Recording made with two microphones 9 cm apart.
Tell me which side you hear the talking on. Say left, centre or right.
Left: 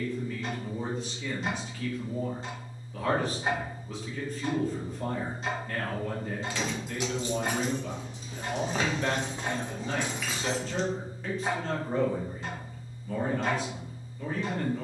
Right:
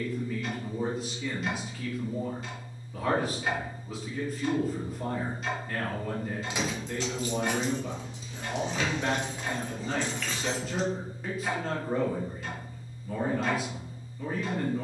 centre.